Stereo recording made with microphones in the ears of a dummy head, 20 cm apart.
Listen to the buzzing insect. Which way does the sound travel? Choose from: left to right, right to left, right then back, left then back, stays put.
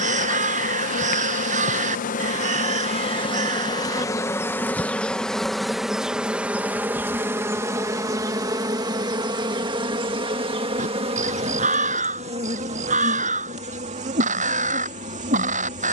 left to right.